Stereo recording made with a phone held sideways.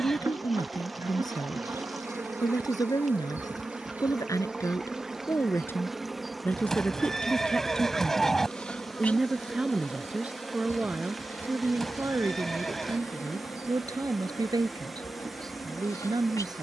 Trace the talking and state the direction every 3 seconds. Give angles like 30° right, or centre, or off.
30° left, 20° left, 10° left, 10° right, 20° right, 30° right.